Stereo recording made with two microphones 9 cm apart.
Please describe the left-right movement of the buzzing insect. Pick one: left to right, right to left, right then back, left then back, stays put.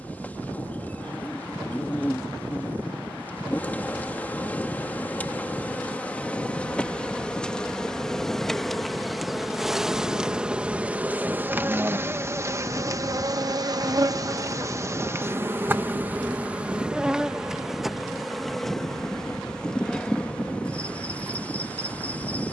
right then back.